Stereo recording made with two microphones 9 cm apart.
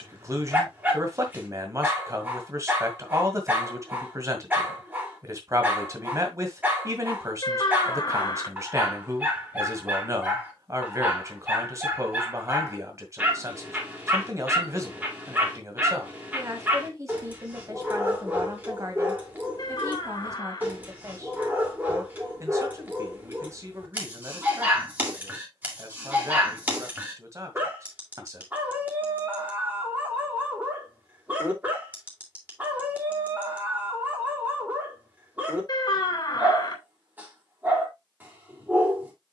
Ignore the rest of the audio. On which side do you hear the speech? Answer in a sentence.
You can hear the speech on the right.